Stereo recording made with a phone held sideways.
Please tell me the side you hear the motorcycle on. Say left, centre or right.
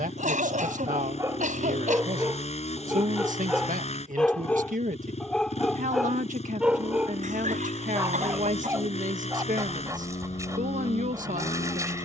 left.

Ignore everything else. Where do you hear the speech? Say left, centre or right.
right.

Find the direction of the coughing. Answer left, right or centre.
right.